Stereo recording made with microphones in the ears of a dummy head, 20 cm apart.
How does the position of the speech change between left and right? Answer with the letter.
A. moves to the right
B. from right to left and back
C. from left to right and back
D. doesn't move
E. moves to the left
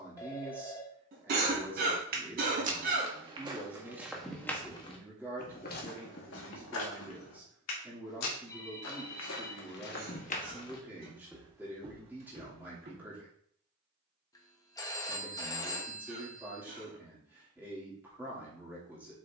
D.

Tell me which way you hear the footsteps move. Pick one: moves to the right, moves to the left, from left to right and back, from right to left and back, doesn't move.
from right to left and back.